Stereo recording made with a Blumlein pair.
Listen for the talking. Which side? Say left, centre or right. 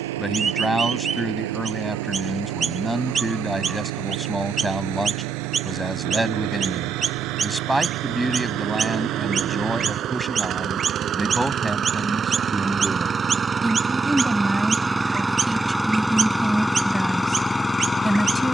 centre.